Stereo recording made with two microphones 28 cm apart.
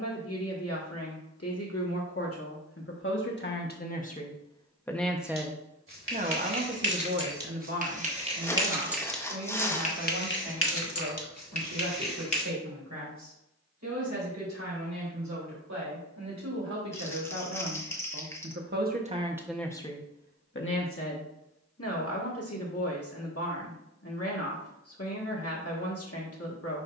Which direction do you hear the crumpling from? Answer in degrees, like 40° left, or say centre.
10° left.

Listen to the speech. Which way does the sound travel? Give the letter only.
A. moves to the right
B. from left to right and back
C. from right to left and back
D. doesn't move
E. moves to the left
B.